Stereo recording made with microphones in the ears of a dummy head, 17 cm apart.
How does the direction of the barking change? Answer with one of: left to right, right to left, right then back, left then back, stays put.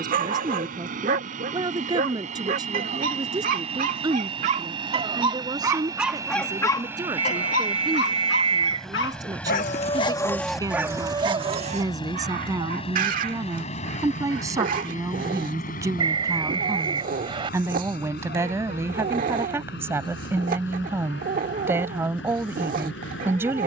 left then back.